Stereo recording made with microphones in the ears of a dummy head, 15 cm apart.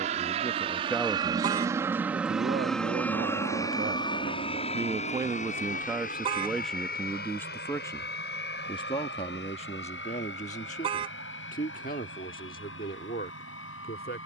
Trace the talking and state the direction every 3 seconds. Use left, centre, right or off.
centre, right, centre, left, left.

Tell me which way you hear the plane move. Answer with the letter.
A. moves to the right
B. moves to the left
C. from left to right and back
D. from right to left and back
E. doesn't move
B.